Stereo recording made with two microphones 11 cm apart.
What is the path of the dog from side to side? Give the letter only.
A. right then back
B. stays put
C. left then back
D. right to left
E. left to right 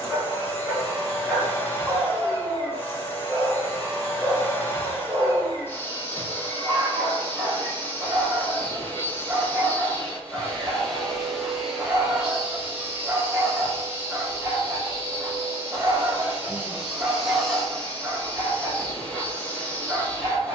B.